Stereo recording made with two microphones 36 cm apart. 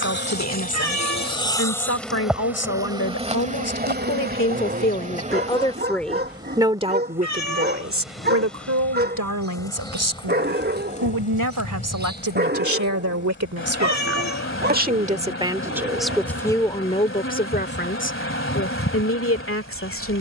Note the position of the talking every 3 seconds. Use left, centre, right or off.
left, left, right, right, right, centre, left.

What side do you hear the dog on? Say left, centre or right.
right.